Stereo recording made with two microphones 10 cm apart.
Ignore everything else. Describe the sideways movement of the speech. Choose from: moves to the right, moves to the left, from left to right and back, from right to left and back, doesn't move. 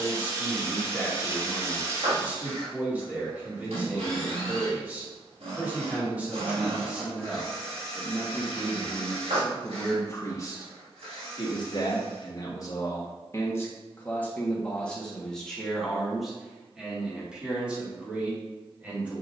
from right to left and back.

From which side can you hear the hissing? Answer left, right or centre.
right.